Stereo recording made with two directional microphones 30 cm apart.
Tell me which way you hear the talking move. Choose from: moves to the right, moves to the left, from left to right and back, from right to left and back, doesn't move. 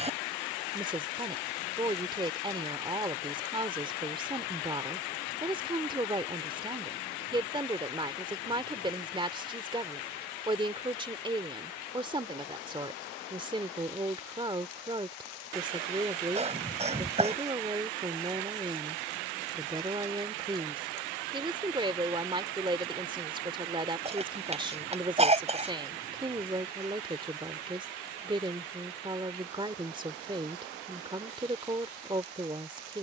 doesn't move.